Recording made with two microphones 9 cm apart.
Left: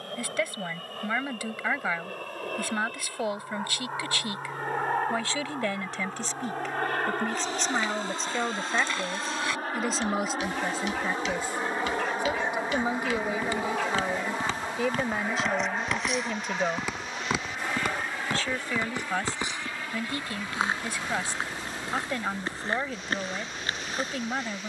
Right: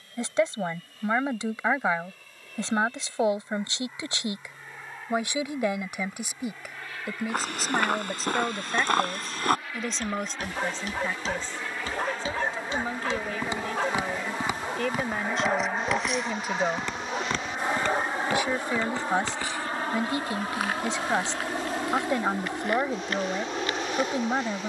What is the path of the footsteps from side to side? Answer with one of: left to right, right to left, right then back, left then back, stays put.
right to left.